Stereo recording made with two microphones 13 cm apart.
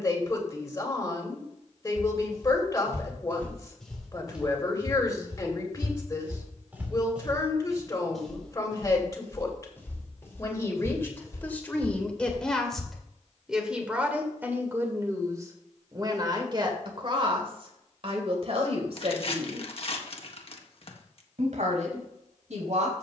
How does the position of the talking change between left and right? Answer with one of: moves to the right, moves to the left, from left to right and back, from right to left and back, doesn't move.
moves to the right.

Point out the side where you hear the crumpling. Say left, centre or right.
left.